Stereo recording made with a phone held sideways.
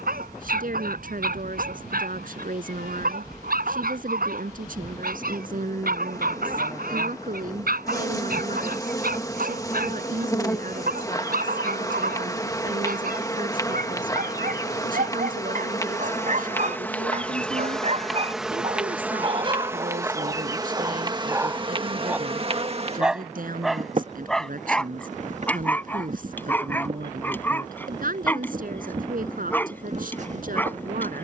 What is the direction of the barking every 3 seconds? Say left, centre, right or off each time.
right, right, right, right, right, right, right, centre, centre, centre, centre.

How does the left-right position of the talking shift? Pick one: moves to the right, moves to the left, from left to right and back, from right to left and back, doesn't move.
doesn't move.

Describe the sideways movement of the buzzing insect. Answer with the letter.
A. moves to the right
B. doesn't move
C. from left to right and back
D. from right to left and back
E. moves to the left
A.